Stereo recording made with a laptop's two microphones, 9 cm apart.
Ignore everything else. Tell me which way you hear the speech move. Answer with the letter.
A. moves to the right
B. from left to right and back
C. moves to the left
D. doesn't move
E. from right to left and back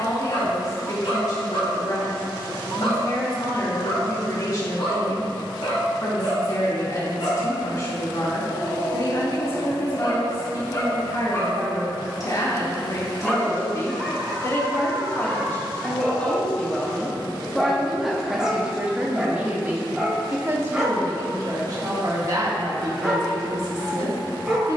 A.